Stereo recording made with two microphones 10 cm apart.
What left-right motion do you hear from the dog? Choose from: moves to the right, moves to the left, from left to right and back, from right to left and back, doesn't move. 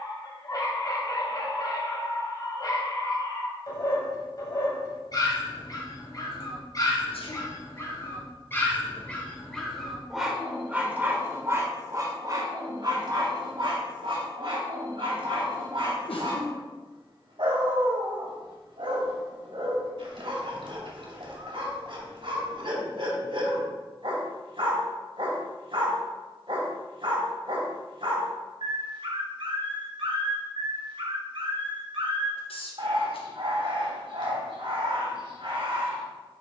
moves to the right.